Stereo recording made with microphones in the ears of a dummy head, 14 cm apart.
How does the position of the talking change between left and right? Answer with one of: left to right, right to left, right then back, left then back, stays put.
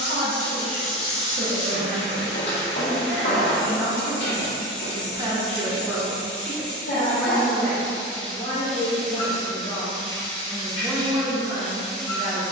left then back.